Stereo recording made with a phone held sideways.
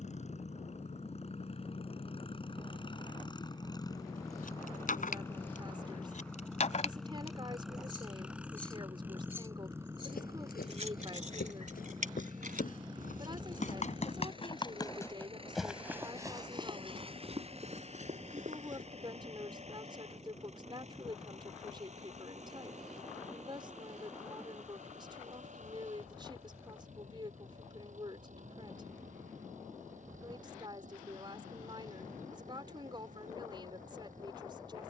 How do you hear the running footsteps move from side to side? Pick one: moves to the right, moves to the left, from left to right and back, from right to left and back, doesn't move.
moves to the right.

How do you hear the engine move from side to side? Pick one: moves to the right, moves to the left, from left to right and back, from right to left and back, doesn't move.
moves to the right.